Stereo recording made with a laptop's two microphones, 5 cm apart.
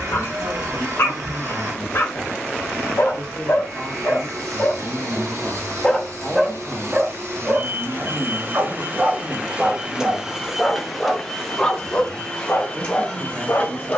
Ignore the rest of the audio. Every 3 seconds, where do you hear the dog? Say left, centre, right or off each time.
left, left, right, centre, left.